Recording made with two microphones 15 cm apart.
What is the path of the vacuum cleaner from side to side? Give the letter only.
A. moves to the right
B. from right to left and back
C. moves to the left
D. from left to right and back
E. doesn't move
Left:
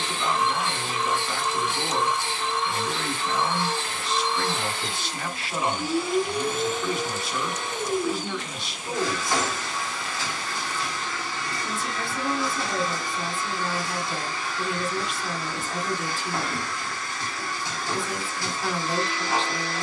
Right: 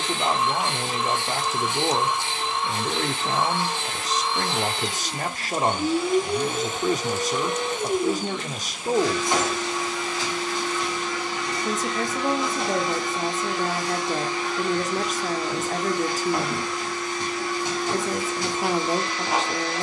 E.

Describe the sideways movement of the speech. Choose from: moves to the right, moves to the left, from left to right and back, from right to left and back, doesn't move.
doesn't move.